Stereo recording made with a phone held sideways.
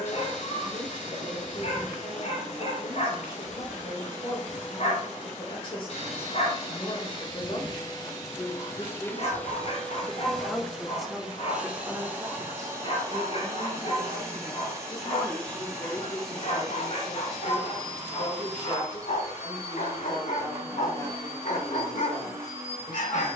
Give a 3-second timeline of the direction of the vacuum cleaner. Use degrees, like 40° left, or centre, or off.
70° left, 60° left, 40° left, centre, 20° right, 20° right, 20° right, 20° right.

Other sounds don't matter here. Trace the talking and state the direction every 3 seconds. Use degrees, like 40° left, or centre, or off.
40° left, 40° left, 40° left, 10° left, 30° right, 20° left, 30° left, 30° left.